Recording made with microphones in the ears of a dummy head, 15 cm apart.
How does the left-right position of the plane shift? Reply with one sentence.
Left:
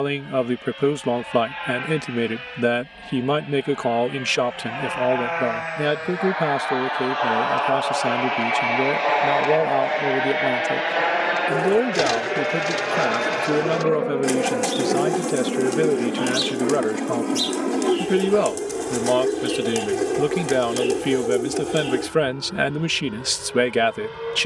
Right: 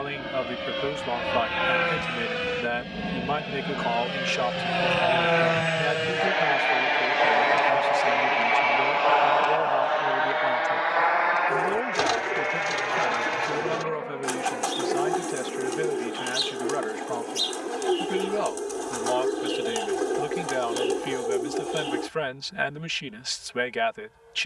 In this clip you hear the plane go from the right side to the left.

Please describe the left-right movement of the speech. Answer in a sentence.
You can hear the speech stay in one place.